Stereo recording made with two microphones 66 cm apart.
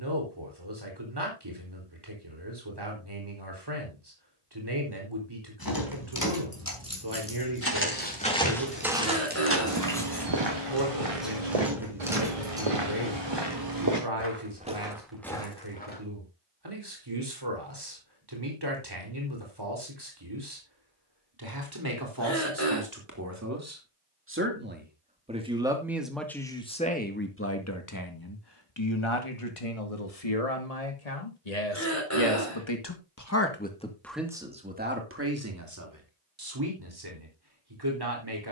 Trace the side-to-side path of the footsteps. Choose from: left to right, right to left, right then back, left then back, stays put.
right then back.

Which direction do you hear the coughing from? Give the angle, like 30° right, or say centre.
20° left.